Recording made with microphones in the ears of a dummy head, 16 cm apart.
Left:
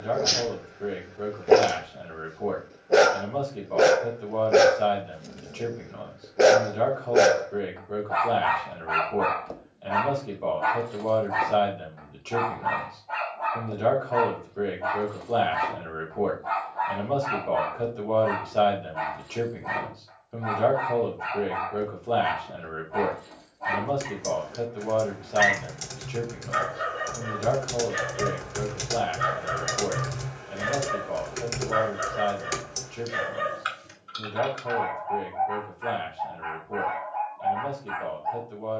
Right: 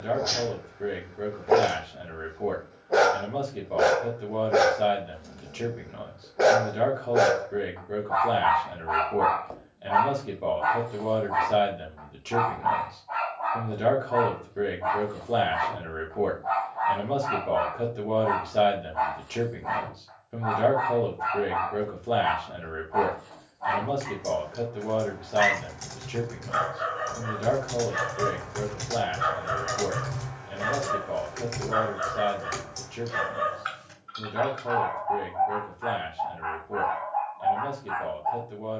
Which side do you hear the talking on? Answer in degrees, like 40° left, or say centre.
10° right.